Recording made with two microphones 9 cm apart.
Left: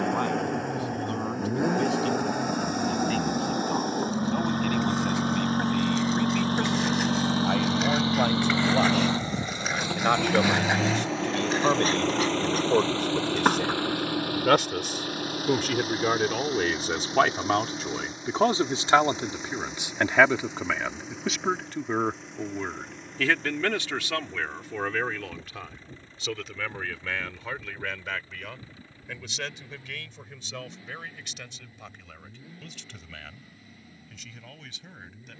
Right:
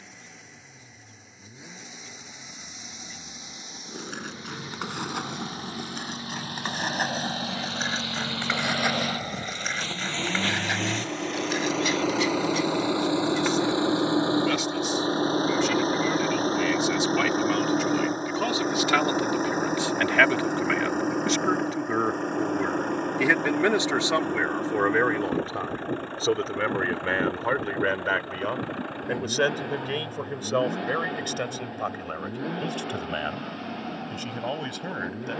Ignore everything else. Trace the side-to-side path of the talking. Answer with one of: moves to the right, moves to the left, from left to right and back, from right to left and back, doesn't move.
moves to the right.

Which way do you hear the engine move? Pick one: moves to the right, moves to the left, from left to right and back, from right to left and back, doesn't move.
moves to the right.